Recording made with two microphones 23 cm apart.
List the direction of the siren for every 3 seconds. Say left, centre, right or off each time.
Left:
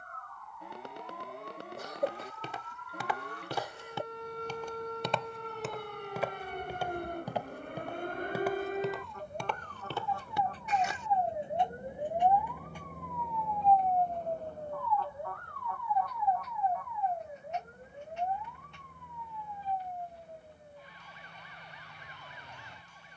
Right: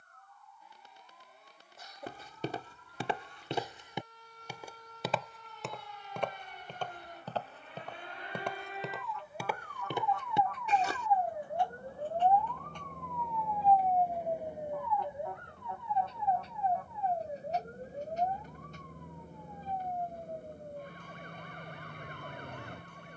left, left, left, left, centre, right, right, right.